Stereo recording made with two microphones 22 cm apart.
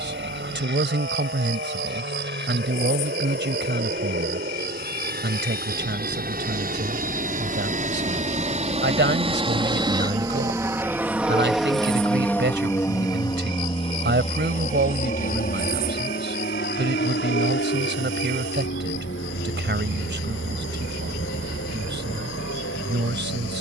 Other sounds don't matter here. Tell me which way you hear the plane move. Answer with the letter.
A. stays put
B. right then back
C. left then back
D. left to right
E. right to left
E.